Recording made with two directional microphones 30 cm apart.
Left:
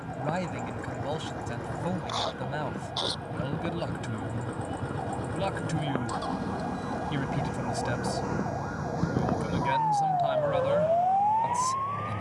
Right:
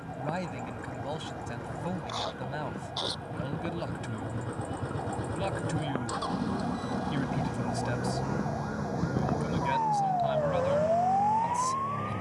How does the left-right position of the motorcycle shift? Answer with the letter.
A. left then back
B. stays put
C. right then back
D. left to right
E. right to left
D.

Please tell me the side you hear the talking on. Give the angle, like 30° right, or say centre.
20° left.